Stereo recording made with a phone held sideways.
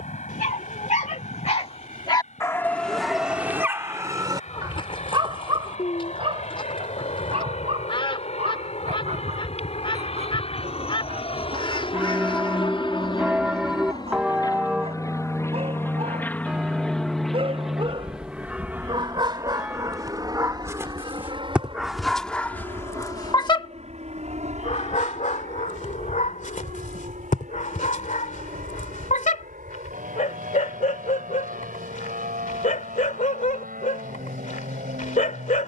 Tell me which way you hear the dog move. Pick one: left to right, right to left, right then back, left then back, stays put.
right then back.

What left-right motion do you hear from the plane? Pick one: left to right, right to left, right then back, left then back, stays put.
left to right.